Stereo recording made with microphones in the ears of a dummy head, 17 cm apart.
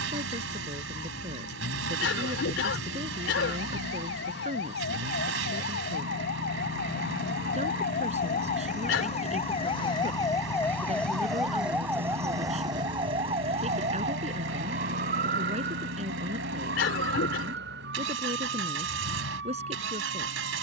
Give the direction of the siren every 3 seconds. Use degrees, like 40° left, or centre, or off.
80° left, 70° left, 50° left, 10° left, 30° right, 60° right, 70° right.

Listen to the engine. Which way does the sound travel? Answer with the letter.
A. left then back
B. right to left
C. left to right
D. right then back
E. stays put
E.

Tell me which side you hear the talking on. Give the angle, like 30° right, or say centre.
30° right.